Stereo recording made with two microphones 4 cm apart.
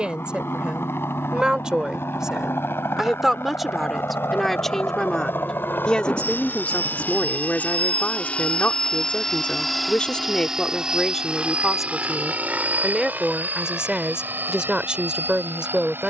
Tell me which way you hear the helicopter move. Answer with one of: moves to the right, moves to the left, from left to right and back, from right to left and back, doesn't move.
moves to the right.